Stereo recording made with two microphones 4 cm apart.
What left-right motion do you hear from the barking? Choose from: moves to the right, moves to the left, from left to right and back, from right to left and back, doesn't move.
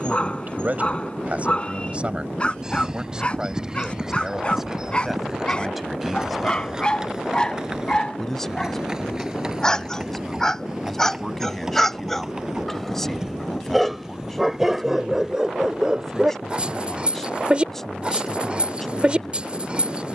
moves to the right.